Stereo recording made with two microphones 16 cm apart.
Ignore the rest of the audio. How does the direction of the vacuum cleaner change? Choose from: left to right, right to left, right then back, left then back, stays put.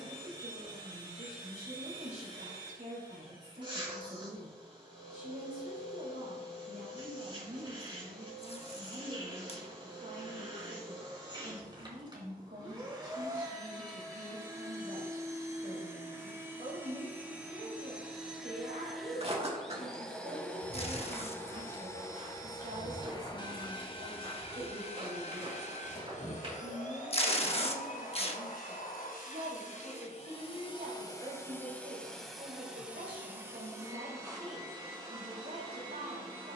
left then back.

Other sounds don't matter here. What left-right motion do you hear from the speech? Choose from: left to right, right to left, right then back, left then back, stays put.
stays put.